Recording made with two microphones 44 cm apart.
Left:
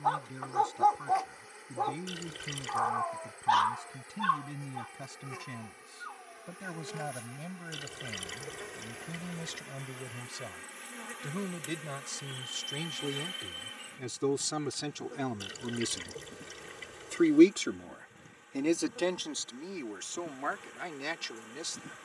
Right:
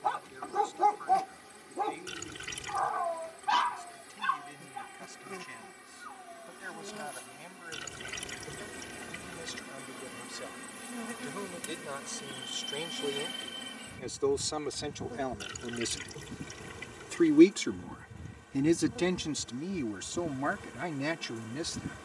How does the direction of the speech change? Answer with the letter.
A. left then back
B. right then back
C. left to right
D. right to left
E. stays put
C.